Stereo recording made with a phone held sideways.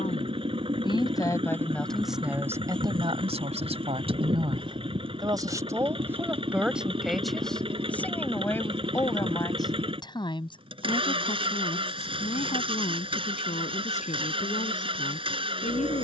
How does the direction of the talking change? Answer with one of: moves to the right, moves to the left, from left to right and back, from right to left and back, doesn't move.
from left to right and back.